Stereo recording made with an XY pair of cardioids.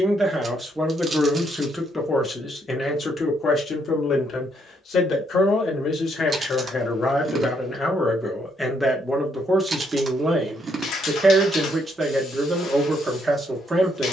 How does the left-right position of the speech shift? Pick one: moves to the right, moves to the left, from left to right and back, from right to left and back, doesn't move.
from right to left and back.